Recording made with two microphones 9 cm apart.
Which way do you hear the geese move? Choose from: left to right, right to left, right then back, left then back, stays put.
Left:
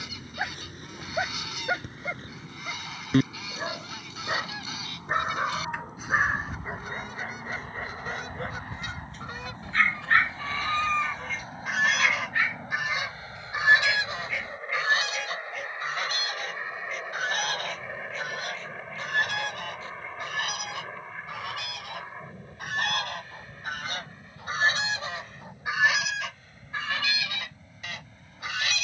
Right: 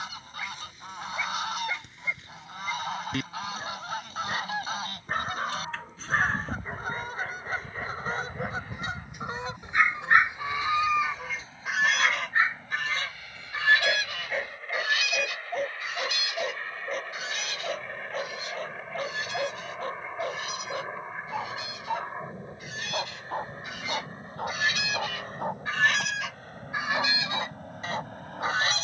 left then back.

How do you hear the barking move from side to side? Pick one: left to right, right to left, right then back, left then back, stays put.
left to right.